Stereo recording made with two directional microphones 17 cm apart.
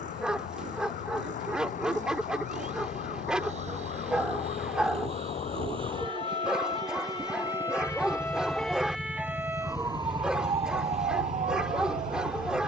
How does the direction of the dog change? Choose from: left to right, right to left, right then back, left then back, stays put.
stays put.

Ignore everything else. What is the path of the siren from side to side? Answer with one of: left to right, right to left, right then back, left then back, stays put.
left to right.